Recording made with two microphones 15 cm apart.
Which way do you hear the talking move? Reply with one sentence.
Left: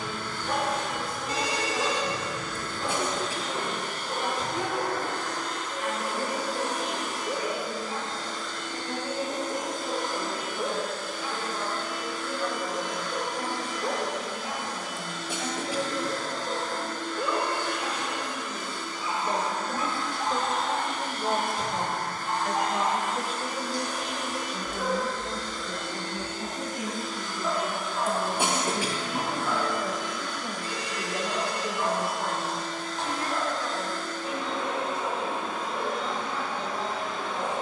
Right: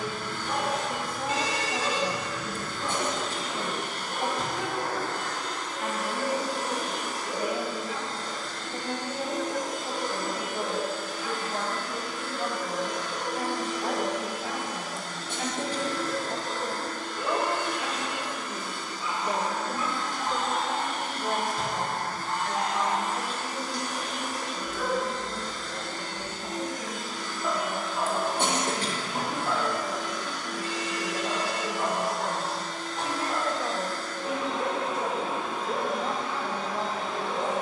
In this clip you hear the talking go left and come back.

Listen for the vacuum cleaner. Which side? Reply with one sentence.
You can hear the vacuum cleaner on the right.